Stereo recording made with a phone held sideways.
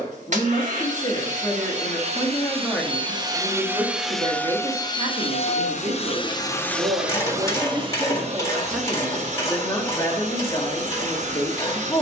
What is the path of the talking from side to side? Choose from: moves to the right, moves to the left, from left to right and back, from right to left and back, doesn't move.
from left to right and back.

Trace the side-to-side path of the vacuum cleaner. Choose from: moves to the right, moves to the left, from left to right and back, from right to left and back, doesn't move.
from right to left and back.